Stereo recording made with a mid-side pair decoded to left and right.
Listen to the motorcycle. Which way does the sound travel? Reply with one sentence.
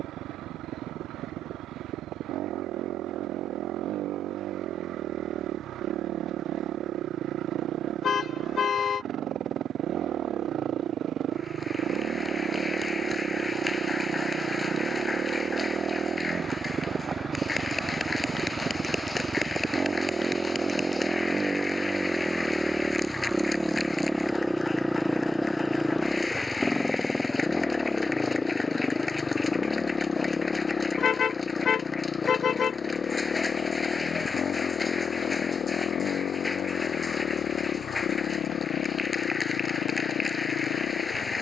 You can hear the motorcycle go from the right side to the left.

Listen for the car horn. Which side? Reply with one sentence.
You can hear the car horn on the left.